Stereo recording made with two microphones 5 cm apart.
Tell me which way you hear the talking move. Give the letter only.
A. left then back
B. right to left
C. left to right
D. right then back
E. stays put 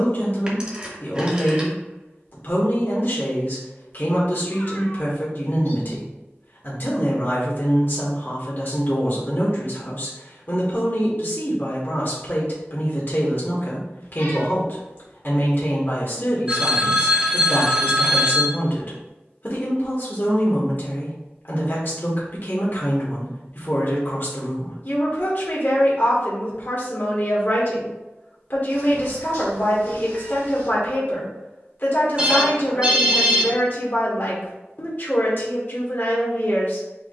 E.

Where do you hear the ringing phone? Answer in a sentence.
In this clip you hear the ringing phone on the right.